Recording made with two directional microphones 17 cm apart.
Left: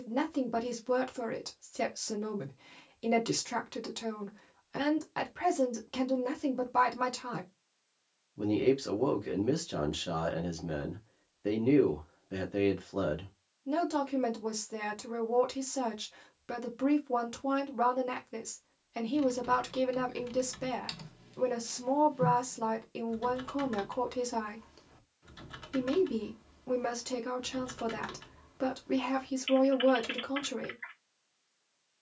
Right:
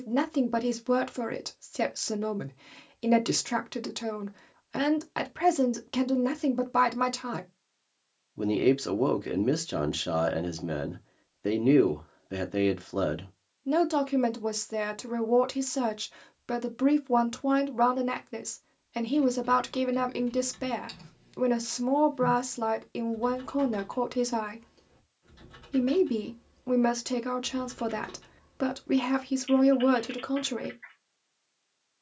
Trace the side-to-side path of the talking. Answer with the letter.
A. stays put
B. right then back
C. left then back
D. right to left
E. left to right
A.